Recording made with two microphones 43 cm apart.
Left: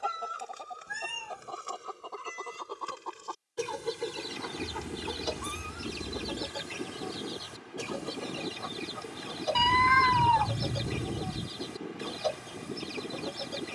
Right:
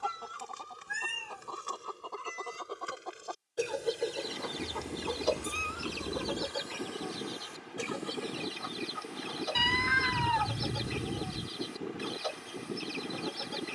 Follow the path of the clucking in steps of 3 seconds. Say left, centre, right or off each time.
centre, left, left, left, left.